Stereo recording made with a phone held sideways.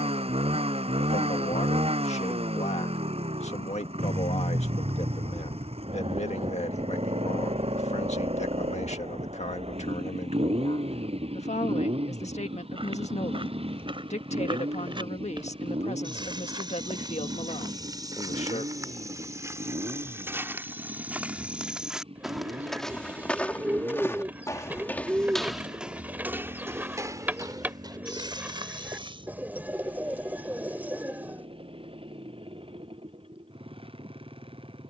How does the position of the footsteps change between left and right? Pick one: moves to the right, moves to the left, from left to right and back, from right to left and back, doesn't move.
from right to left and back.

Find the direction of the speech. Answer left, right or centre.
left.